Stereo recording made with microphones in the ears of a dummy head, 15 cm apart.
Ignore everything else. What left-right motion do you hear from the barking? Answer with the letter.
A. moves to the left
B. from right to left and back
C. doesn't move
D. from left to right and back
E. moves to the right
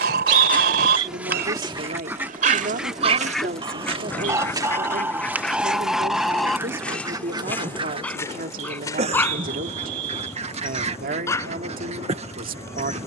A.